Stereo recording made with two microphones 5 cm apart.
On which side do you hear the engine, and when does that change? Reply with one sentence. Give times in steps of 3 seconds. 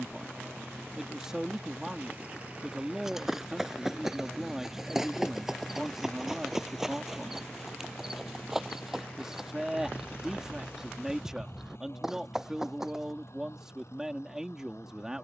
In this clip you hear the engine on the right from 0 s, in the centre from 3 s and on the left from 6 s.